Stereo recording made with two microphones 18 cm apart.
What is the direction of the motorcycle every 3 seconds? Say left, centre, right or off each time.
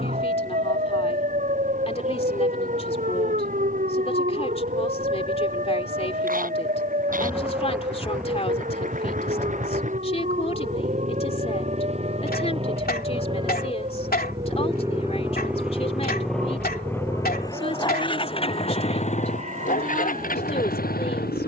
right, right, right, right, right, centre, left.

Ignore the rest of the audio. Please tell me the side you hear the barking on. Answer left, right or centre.
left.